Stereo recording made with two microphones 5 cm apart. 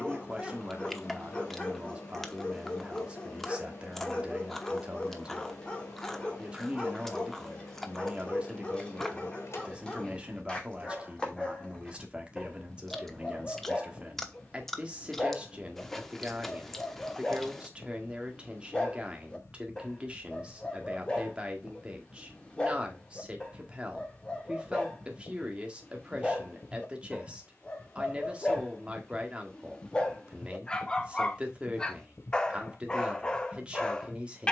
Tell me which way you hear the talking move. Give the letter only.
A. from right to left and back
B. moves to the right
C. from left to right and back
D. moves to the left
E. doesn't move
E.